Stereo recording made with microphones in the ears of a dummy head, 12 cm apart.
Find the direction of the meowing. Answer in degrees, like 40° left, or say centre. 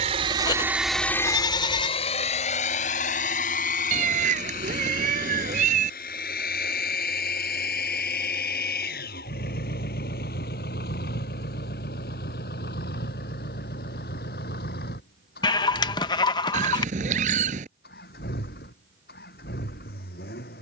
60° right.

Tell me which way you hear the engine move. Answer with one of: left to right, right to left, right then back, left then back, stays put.
right to left.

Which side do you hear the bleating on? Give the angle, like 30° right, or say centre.
30° left.